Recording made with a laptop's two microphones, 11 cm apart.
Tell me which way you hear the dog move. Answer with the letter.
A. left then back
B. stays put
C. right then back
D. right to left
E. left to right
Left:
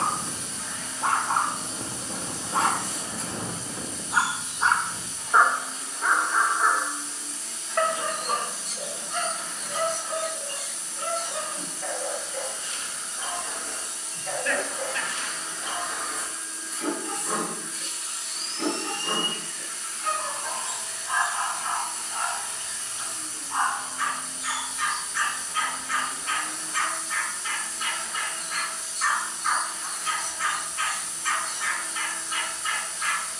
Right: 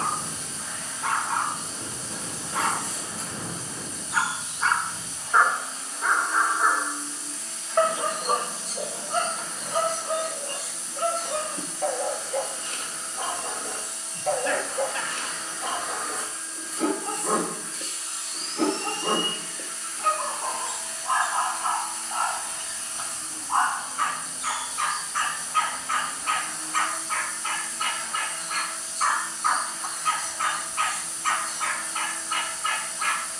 E.